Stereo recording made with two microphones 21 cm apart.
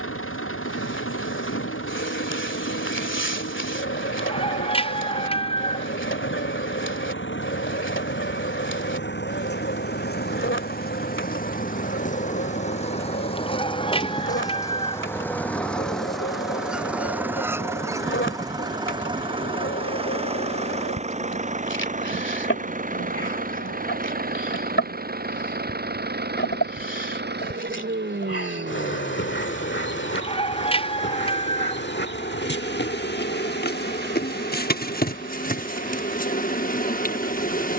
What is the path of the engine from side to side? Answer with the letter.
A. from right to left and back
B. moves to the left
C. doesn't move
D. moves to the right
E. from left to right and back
D.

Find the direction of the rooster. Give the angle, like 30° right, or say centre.
30° left.